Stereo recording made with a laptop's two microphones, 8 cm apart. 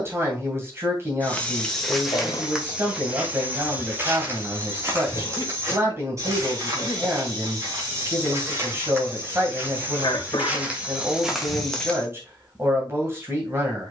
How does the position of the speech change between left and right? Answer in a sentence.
In this clip you hear the speech stay put.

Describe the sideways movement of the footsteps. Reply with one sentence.
You can hear the footsteps go right and come back.